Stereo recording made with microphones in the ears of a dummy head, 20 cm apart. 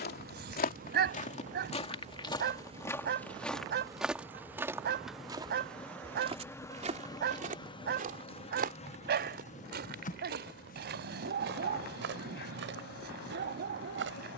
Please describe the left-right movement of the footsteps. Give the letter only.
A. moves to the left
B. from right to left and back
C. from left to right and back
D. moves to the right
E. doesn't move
D.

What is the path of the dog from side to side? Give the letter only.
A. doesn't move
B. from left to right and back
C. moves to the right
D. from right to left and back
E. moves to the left
A.